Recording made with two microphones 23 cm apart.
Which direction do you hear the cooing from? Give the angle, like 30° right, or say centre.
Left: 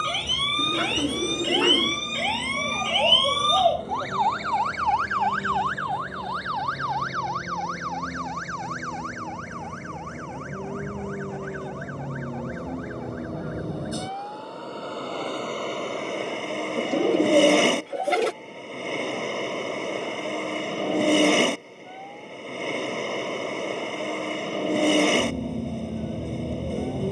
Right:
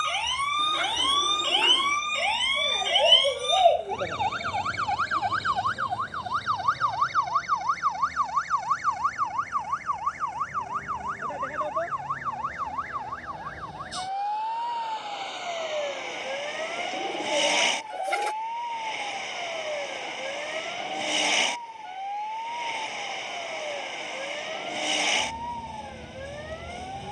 70° left.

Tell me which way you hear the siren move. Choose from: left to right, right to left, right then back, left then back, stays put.
left to right.